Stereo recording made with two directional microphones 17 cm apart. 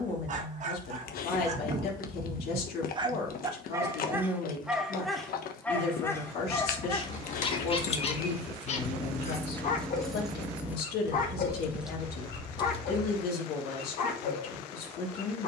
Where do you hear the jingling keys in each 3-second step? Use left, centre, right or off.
off, off, left, centre, left.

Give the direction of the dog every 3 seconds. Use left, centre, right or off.
right, centre, left, left, left.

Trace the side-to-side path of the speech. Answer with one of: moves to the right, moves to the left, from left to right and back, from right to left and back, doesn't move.
doesn't move.